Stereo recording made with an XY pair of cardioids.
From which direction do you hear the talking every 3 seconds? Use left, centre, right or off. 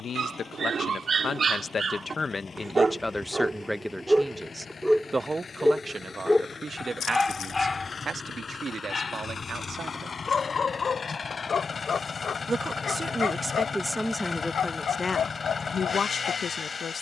left, centre, right, right, centre, left.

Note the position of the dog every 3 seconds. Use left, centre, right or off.
right, centre, left, left, left, left.